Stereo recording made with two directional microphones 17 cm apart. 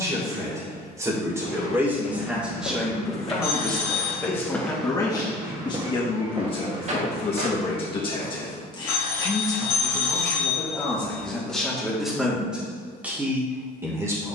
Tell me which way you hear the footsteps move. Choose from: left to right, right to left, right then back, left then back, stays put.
left to right.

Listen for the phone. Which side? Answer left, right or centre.
left.